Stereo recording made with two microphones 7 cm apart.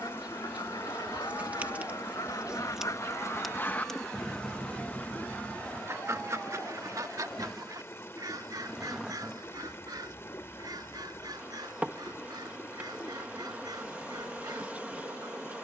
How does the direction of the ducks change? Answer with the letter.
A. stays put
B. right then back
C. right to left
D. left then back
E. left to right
E.